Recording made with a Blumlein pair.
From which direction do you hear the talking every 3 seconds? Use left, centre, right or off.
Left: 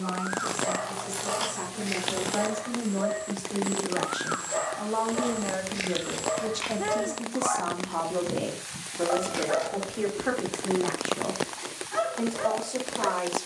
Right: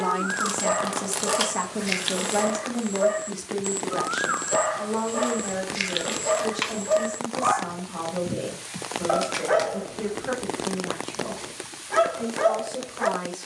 right, centre, left, left, left.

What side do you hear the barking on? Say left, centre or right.
right.